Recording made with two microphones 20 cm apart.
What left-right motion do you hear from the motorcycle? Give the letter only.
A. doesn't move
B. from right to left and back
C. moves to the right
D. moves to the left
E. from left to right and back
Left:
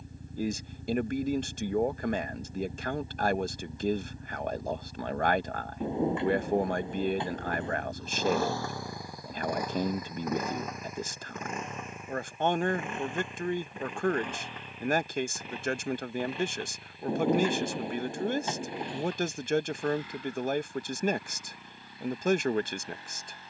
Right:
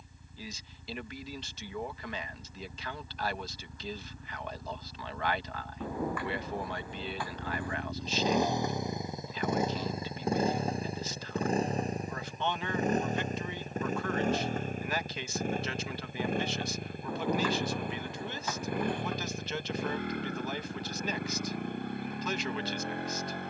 C.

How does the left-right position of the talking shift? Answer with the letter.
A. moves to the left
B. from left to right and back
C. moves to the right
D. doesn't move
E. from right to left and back
D.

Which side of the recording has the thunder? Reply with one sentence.
In this clip you hear the thunder on the left.